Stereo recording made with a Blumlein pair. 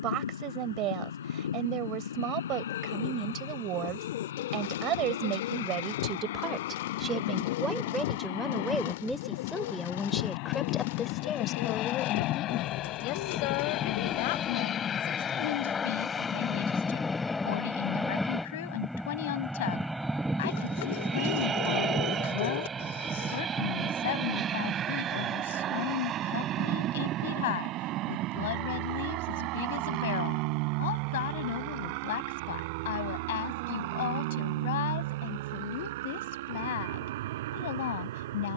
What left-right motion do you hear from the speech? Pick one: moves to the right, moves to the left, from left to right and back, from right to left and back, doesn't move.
moves to the left.